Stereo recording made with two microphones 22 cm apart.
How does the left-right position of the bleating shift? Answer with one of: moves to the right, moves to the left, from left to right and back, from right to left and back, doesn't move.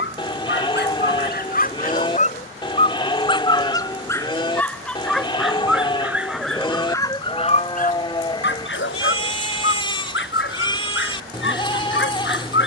doesn't move.